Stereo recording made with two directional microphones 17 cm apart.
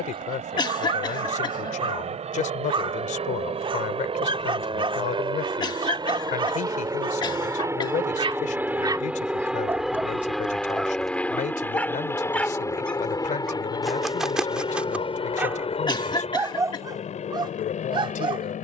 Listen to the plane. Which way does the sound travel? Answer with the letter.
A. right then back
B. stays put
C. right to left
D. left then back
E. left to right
C.